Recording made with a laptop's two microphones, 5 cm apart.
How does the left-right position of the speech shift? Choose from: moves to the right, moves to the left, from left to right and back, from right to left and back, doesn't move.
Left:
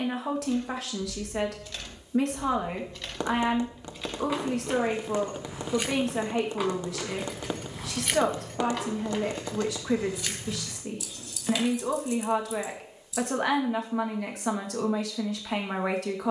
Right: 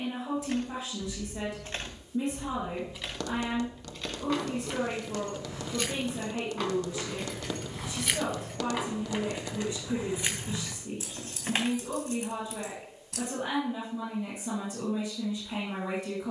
doesn't move.